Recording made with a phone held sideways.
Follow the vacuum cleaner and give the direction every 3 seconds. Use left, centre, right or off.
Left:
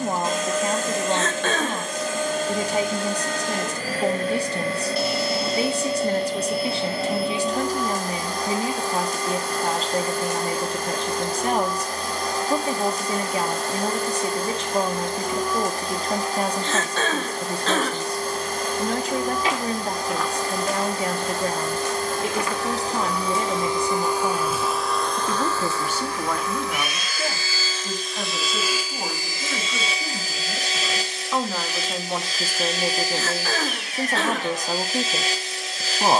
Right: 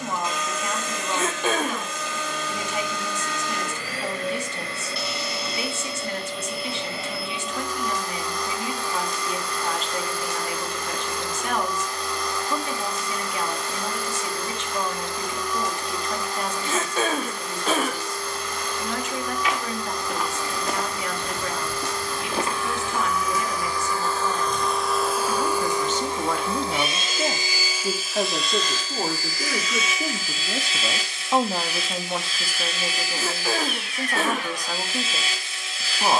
left, left, left, left, left, left, left, left, centre, centre, left, left.